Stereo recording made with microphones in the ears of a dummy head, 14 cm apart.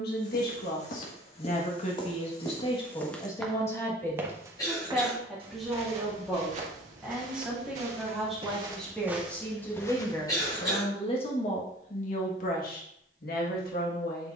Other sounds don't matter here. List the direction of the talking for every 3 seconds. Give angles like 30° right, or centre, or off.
50° left, 10° left, centre, 30° left, 60° left.